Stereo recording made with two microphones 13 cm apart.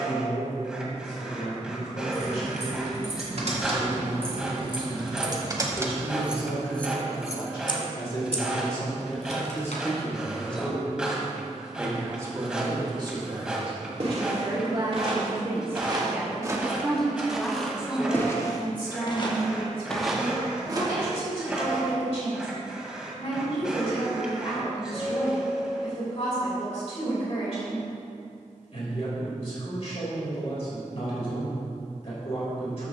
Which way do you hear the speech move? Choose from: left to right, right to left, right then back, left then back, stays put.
right then back.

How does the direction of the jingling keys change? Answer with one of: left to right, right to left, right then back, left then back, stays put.
right to left.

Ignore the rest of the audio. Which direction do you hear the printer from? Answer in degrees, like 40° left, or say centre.
10° right.